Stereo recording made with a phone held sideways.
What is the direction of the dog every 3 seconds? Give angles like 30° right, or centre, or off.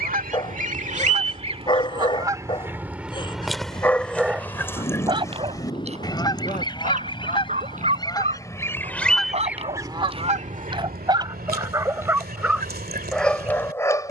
30° left, 10° right, 50° right, 30° right, 10° left.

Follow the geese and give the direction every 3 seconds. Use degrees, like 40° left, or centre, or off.
40° right, 10° left, 30° left, 50° right, 80° right.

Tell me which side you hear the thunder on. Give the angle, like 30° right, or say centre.
30° left.